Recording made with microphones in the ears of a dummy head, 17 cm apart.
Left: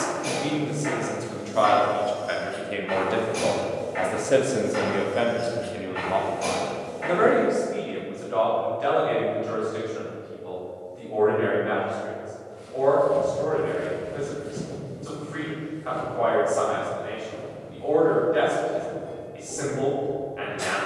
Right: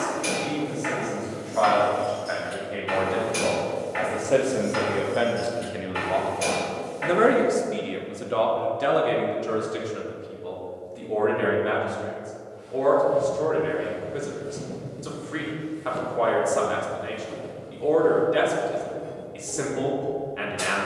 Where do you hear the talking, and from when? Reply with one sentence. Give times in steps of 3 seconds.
You can hear the talking on the left from 0 s, in the centre from 3 s and on the right from 6 s.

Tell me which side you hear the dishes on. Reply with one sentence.
In this clip you hear the dishes on the right.